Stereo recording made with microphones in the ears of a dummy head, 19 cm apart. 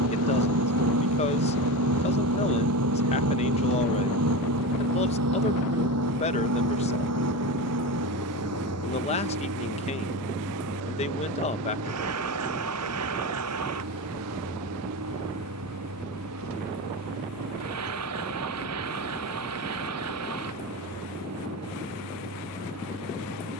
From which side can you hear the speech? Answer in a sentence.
In this clip you hear the speech on the left.